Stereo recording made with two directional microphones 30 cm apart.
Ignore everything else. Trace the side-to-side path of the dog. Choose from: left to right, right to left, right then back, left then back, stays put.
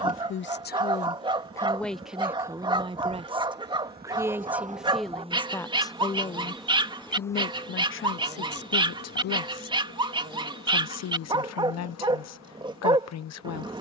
stays put.